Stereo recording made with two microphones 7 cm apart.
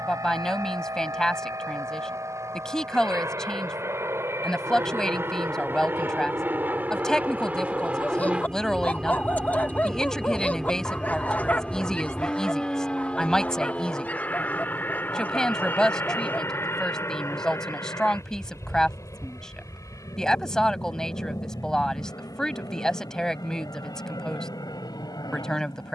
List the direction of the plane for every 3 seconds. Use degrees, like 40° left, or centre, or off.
50° right, 40° right, 20° right, centre, 20° left, 30° left, 40° left, 50° left, 60° left.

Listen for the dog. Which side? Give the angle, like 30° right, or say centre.
20° left.